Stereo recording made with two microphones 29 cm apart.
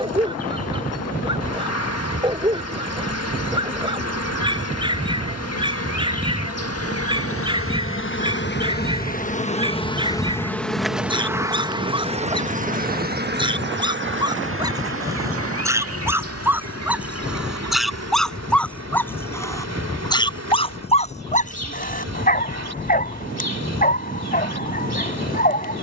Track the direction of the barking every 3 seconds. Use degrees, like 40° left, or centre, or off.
20° right, 20° right, 20° right, 20° right, 10° right, 10° right, 10° left, 30° left, 30° left.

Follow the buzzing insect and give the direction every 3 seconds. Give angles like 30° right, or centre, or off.
60° left, 60° left, 50° left, 10° left, 40° right, 60° right, 60° right, 60° right, 60° right.